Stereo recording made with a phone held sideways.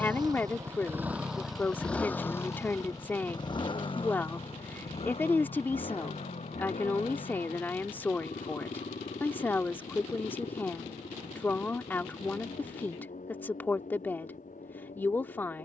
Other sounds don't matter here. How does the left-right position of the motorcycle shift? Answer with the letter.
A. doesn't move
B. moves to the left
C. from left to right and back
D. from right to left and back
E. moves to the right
B.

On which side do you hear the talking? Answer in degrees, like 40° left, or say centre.
10° left.